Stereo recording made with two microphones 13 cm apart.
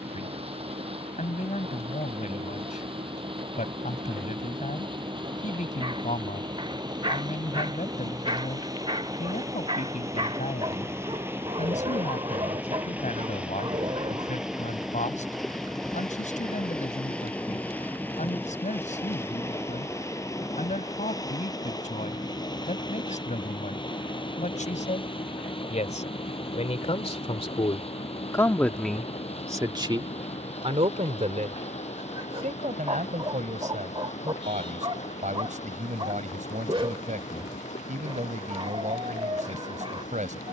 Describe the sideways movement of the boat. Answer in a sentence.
You can hear the boat travel towards the left.